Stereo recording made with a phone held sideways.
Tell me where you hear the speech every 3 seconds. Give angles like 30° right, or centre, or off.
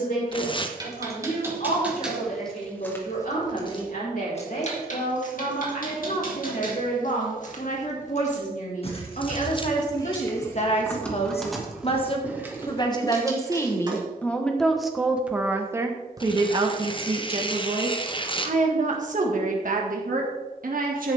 70° left, 70° left, 60° left, 50° left, 20° left, 30° right, 60° right.